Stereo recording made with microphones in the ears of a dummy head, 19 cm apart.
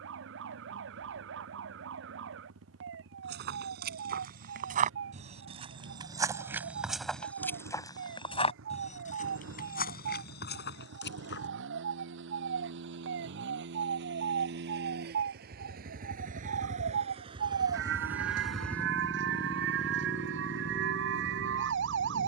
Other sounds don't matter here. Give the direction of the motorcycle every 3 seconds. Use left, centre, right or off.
right, right, right, right, right, right, left, left.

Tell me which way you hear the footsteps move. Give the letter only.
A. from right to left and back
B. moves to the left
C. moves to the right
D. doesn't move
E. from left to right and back
B.